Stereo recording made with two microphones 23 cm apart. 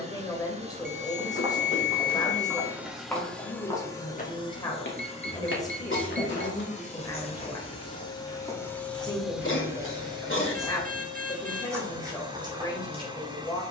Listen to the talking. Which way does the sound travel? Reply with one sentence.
You can hear the talking stay put.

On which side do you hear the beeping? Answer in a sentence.
In this clip you hear the beeping on the right.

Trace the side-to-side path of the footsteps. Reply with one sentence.
In this clip you hear the footsteps go left and come back.